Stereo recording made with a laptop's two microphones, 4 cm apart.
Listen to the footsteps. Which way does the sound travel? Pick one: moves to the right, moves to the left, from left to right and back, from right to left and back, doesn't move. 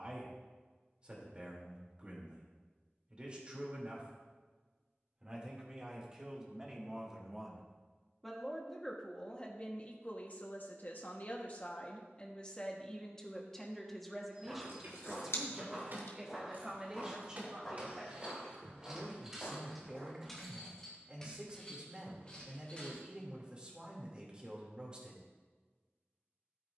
moves to the left.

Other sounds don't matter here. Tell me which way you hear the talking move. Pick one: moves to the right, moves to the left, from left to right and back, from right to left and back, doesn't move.
from right to left and back.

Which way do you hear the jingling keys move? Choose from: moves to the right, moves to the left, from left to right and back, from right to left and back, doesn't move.
moves to the left.